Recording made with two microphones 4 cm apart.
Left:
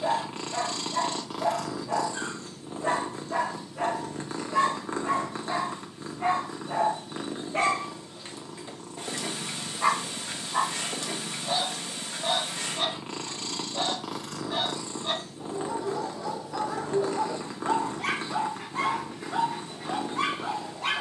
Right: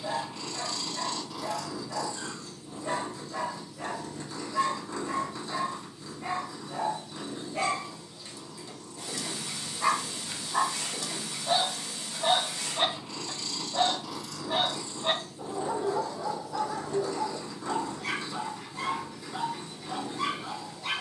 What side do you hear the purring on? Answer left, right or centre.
left.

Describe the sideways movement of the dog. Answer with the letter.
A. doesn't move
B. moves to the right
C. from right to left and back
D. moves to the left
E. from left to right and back
E.